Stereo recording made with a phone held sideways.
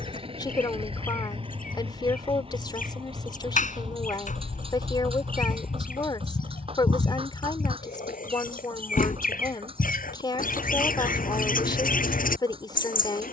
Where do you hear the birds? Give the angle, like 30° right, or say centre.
80° left.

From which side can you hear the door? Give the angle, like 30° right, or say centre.
70° left.